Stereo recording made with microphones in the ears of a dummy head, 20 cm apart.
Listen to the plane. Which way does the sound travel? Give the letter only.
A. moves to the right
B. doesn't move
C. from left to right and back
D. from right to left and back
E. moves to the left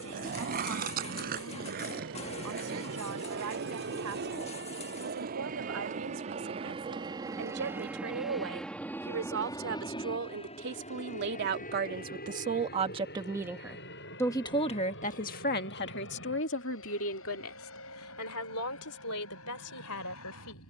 E.